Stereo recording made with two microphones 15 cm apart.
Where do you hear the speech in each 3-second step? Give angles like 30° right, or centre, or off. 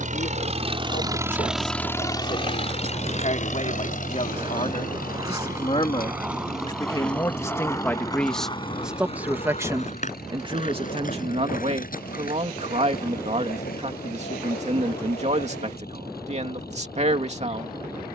60° left, 50° left, 20° left, 30° right, 50° right, 50° right.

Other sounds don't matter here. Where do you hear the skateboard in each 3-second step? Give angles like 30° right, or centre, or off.
50° right, 30° right, 10° left, 50° left, 70° left, 80° left.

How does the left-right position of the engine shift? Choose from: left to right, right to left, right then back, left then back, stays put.
right to left.